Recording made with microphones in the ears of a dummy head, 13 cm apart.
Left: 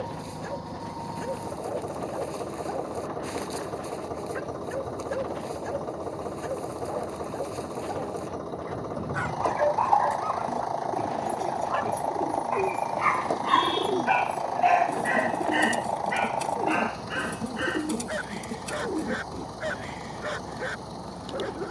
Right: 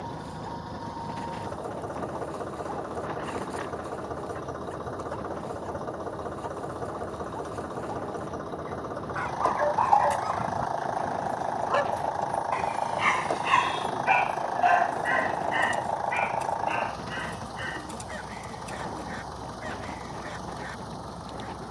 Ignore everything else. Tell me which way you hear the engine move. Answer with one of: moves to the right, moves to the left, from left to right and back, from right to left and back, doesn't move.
doesn't move.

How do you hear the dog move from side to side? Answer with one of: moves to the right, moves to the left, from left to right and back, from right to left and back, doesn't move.
from left to right and back.